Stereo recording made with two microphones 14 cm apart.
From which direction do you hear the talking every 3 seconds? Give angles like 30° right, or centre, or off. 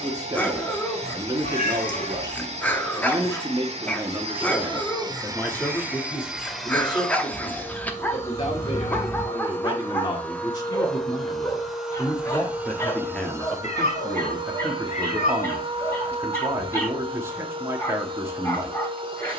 30° right, 10° right, 30° left, 30° left, centre, 20° right, 20° right.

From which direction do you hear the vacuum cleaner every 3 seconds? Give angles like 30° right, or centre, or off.
50° right, 40° right, 10° left, 10° left, 20° right, 40° right, 40° right.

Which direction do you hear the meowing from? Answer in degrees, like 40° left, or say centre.
60° left.